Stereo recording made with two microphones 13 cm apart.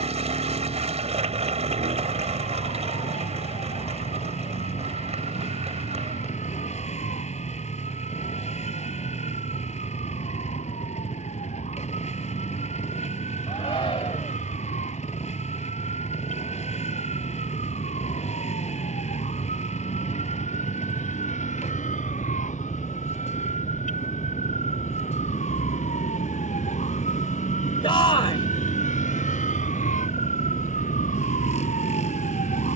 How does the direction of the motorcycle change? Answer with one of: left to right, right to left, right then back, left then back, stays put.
stays put.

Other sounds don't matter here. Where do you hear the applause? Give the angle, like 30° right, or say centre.
50° right.